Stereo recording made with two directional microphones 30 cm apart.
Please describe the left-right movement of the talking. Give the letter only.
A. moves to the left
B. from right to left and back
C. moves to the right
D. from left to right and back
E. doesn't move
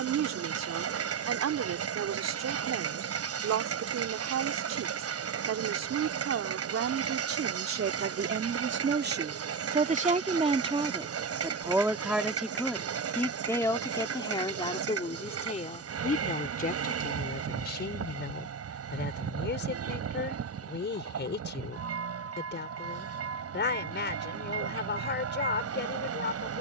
A.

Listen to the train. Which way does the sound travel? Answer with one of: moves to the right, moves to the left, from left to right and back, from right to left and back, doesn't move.
doesn't move.